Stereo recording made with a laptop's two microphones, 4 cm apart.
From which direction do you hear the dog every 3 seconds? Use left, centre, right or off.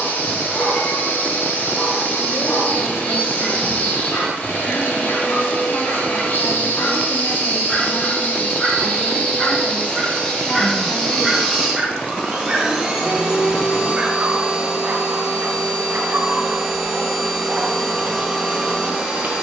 left, left, left, centre, right, right, right.